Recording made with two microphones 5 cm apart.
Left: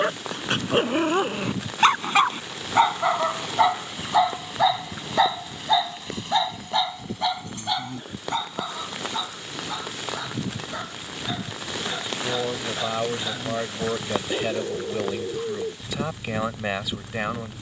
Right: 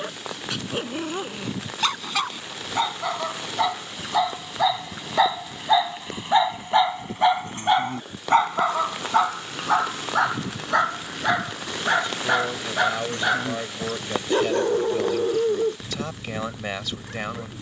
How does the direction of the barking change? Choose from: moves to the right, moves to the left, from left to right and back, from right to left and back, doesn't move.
moves to the right.